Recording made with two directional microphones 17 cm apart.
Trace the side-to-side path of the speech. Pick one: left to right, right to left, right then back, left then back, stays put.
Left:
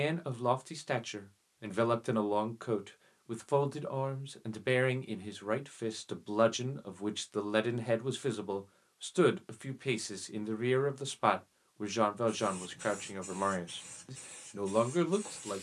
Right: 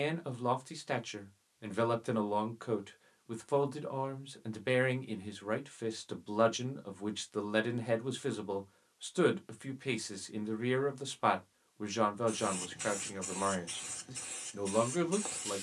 stays put.